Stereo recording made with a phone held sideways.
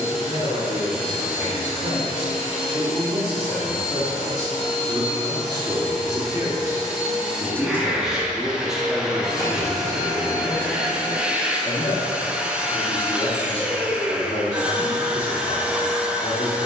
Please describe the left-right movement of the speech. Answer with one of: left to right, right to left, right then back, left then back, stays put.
right to left.